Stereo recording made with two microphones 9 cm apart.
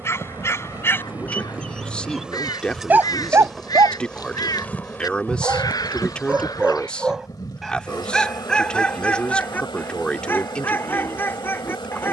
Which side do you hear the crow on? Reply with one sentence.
You can hear the crow on the left.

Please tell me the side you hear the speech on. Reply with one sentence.
You can hear the speech in the centre.